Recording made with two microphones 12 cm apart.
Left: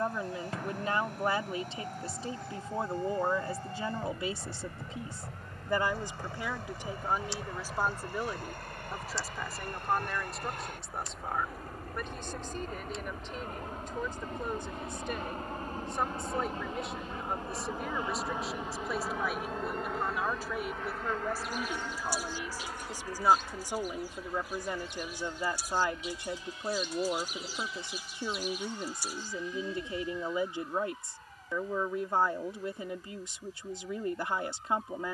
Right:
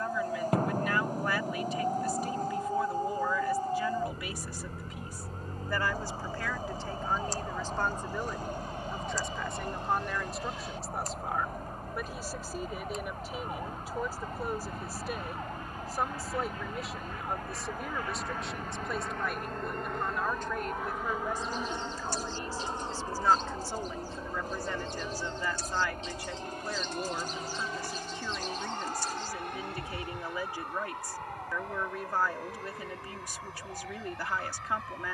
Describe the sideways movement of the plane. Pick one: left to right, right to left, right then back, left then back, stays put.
left to right.